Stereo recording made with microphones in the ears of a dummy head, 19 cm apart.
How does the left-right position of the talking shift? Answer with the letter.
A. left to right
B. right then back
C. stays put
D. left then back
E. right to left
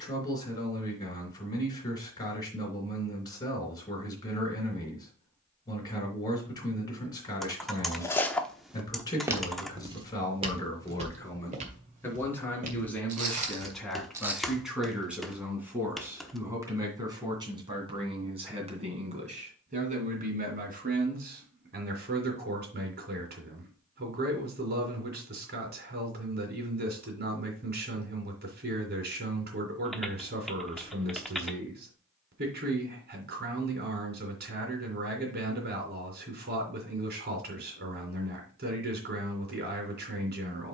A.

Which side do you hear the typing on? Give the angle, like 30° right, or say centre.
centre.